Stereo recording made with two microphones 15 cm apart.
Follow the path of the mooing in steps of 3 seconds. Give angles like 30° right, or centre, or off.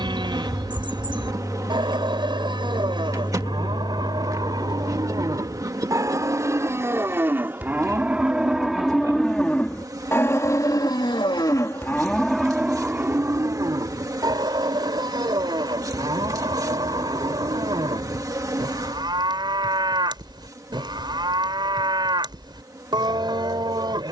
30° right, 30° right, 10° right, 20° left, 20° right, 30° right, 30° right, 30° right.